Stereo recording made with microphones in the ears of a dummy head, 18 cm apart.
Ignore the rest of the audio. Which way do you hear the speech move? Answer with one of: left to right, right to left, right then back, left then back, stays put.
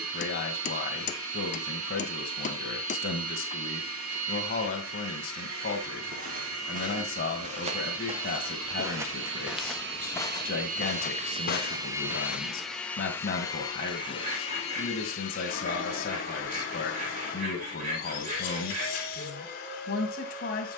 stays put.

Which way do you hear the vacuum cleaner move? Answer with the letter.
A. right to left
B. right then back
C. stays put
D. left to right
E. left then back
A.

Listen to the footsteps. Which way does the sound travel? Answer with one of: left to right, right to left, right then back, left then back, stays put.
right to left.